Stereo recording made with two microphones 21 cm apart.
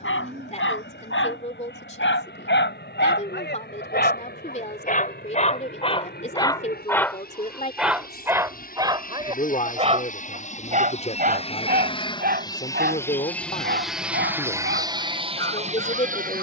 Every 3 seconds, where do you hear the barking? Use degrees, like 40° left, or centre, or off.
70° left, 40° left, centre, 30° right, 50° right, 60° right.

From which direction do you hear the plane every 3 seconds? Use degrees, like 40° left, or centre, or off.
60° left, 60° left, 50° left, 40° left, centre, 30° right.